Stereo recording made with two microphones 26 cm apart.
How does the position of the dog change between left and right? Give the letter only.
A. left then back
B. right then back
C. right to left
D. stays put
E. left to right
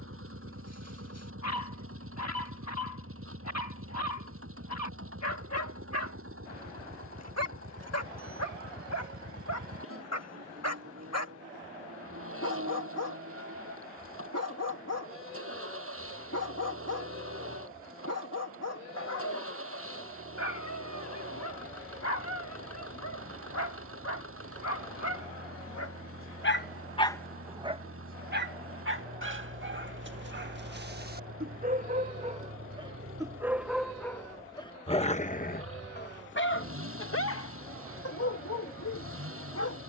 B.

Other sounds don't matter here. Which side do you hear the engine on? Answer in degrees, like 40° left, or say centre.
60° right.